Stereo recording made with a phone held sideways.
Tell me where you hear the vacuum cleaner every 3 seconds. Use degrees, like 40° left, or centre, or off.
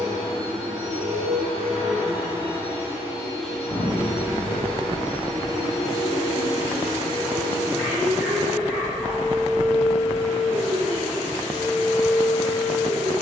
50° right, 10° left, 20° right, 50° right, 50° right.